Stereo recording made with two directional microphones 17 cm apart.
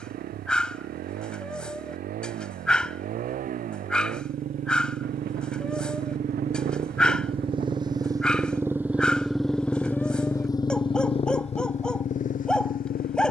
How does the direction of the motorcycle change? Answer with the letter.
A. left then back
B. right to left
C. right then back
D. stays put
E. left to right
B.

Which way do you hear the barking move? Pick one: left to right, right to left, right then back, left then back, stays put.
stays put.